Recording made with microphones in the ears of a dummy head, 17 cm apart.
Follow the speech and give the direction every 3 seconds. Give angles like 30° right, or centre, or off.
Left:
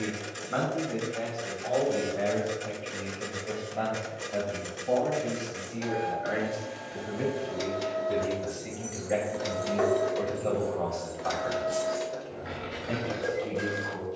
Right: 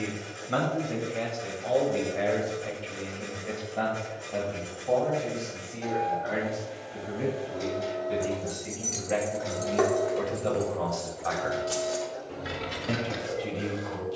40° right, 10° left, 20° left, 10° right, 40° right.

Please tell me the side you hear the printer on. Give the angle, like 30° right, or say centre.
80° left.